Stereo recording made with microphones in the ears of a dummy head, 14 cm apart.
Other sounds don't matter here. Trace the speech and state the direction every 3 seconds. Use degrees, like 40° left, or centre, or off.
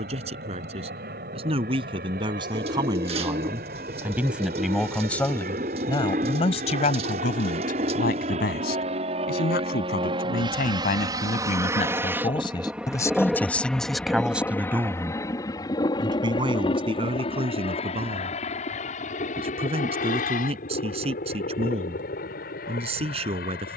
40° right, centre, 50° left, 60° left, 10° left, 30° right, 40° right, 40° right.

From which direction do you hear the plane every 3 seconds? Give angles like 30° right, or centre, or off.
70° right, 60° right, 50° right, 30° right, centre, 30° left, 50° left, 60° left.